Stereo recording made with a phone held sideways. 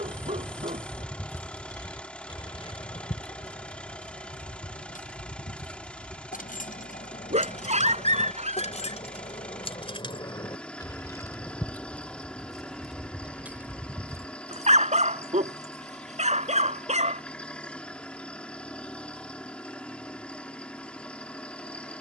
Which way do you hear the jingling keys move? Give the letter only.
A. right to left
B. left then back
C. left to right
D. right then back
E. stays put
B.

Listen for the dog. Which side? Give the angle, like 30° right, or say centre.
50° right.